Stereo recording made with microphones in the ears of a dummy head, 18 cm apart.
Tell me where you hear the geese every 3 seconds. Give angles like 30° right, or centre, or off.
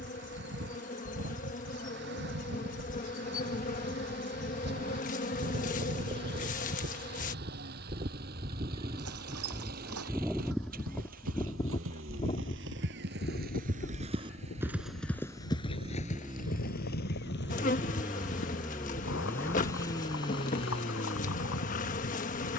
60° right, 60° right, 40° right, centre, 50° left, 70° left, 80° left, 80° left.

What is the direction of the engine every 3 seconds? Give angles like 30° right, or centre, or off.
60° right, 50° right, 50° right, 40° right, 40° right, 20° right, 10° left, 40° left.